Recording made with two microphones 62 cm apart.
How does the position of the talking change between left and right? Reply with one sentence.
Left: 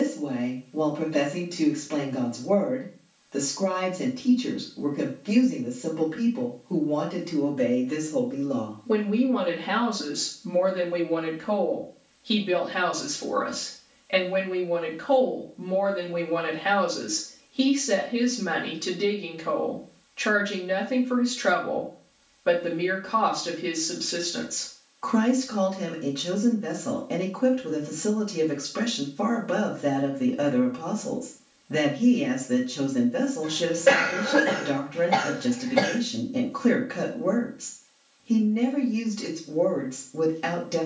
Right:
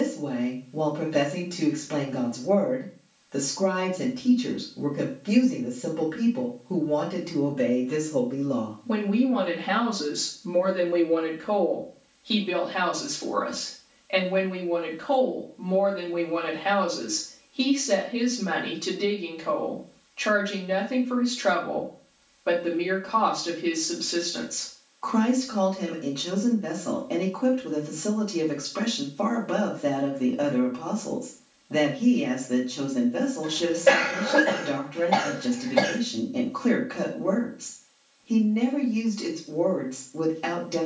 In this clip you hear the talking move from right to left.